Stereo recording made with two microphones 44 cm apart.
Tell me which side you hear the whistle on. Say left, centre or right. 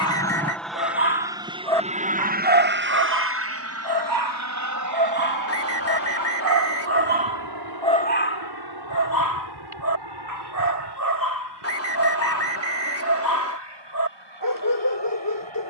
left.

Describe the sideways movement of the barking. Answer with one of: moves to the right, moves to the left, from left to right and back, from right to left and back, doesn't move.
from left to right and back.